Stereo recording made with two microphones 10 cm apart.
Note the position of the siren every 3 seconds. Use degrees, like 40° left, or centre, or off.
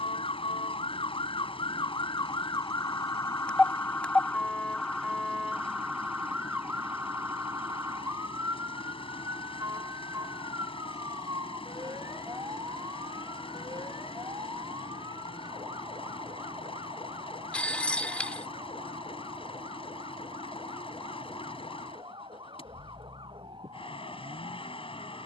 50° left, 10° left, 20° right, 30° right, 40° right, 40° right, 50° right, 50° right, 50° right.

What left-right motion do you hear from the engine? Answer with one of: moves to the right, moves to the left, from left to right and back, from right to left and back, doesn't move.
doesn't move.